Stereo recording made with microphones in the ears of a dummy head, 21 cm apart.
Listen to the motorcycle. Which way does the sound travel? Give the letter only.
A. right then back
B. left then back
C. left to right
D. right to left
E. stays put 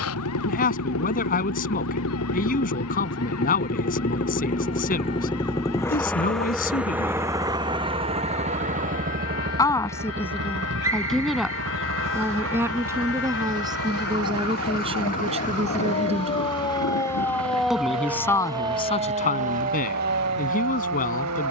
C.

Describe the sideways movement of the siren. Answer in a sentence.
In this clip you hear the siren move to the right.